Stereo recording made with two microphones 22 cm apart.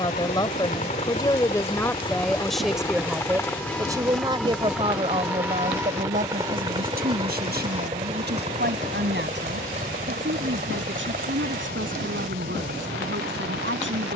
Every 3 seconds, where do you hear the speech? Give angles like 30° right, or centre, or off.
10° left, 20° right, 50° right, 60° right, 60° right.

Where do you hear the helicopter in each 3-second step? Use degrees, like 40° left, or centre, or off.
30° left, centre, 20° right, 40° right, 50° right.